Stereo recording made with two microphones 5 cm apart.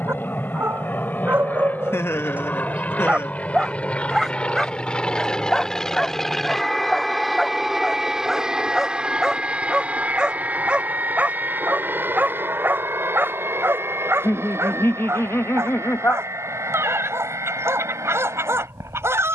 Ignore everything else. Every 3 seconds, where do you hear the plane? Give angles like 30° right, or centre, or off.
40° left, 20° left, centre, 30° right, 50° right, 60° right, 70° right.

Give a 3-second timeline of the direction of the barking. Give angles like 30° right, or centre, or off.
50° right, centre, centre, 20° right, 50° right, 70° right, 70° right.